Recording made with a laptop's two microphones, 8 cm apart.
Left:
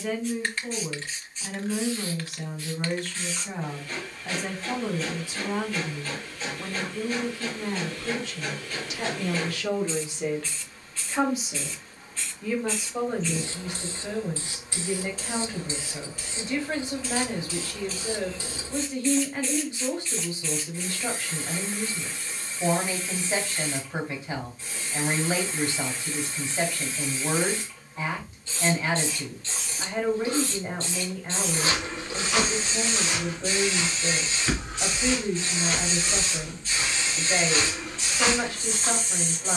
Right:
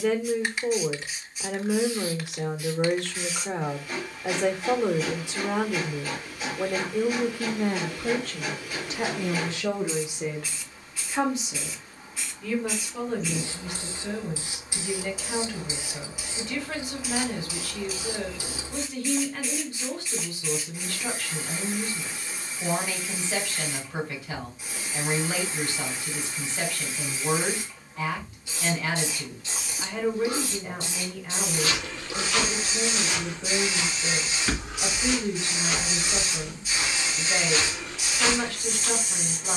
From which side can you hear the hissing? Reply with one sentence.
In this clip you hear the hissing in the centre.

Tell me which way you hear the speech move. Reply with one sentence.
You can hear the speech go from the right side to the left.